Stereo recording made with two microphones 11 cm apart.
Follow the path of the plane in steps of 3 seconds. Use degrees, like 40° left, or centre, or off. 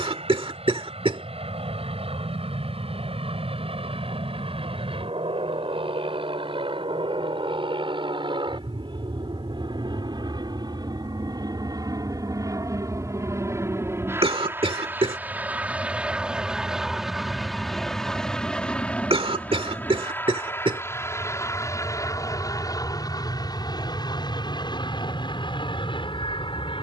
60° right, 60° right, 50° right, 40° right, 20° right, 10° right, 10° left, 30° left, 40° left.